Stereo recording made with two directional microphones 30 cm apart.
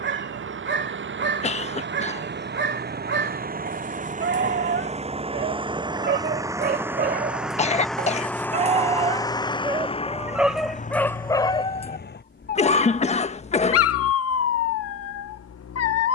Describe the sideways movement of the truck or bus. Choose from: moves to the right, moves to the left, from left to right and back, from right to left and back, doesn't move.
moves to the left.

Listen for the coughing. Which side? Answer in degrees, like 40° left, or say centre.
20° left.